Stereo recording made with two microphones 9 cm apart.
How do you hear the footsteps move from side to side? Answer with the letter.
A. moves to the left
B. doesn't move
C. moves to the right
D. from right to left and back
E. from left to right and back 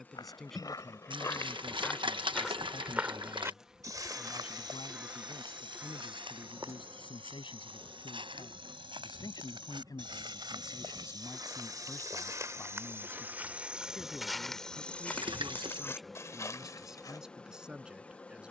E.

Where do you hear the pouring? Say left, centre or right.
right.